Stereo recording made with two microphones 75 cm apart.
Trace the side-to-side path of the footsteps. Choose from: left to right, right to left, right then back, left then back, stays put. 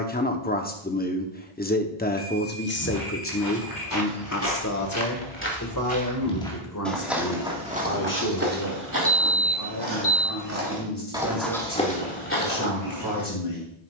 right then back.